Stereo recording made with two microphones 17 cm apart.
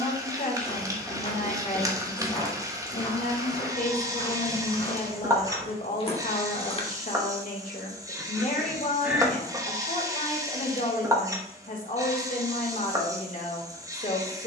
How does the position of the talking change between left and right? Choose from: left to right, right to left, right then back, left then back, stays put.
stays put.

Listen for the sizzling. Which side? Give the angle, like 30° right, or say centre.
20° right.